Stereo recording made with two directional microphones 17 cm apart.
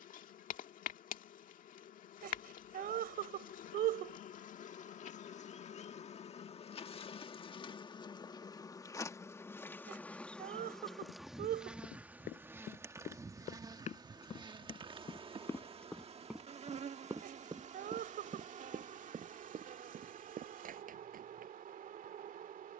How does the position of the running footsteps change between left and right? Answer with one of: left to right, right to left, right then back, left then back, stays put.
left to right.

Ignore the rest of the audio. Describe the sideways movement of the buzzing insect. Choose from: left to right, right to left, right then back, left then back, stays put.
left to right.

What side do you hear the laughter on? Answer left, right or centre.
right.